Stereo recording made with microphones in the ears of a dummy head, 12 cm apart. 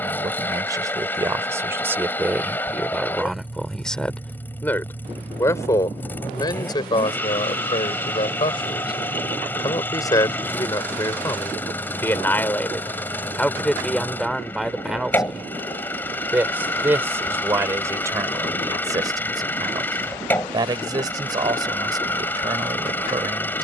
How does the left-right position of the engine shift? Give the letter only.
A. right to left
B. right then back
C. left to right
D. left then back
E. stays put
E.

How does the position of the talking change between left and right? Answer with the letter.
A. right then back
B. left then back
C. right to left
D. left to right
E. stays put
B.